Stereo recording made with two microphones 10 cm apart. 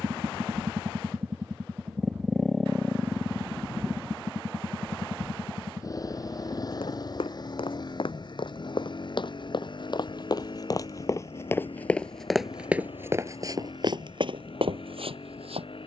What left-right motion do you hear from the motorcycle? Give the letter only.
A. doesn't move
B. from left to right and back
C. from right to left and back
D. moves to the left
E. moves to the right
D.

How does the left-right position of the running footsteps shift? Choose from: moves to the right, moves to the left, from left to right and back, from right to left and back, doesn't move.
moves to the right.